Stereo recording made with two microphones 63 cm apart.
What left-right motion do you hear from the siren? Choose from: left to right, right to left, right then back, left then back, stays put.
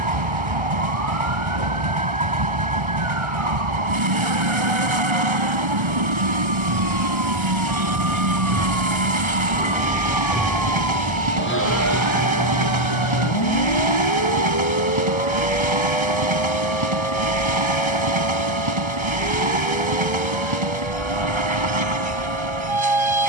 right to left.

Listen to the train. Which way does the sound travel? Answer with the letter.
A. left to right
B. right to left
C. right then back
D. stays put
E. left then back
D.